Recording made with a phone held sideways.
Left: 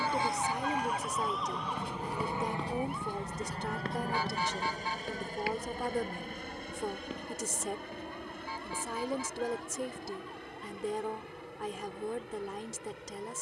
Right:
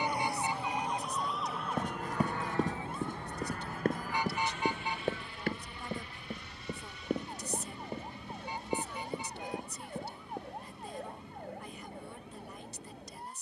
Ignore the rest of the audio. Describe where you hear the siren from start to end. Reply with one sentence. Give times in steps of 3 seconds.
You can hear the siren in the centre from 0 s and on the right from 3 s.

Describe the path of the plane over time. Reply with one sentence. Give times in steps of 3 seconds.
In this clip you hear the plane in the centre from 0 s and on the left from 3 s.